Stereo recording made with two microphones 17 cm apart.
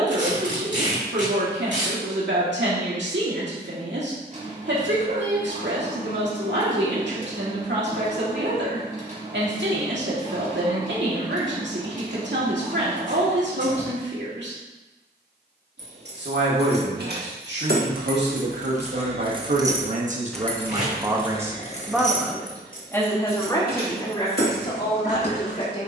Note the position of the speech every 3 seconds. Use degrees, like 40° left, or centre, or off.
80° right, 80° right, 80° right, 80° right, 80° right, 80° right, 50° right, centre, 30° left.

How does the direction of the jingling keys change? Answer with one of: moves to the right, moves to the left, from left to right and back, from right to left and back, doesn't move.
moves to the left.